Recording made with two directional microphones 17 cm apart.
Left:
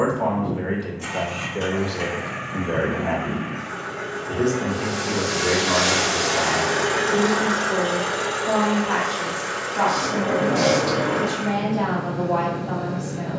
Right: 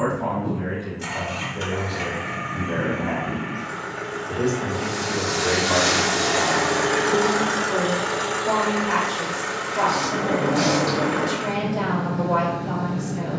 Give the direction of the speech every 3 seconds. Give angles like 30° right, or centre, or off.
50° left, 20° left, 20° right, 30° right, 30° right.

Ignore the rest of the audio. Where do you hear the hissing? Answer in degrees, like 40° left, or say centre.
10° right.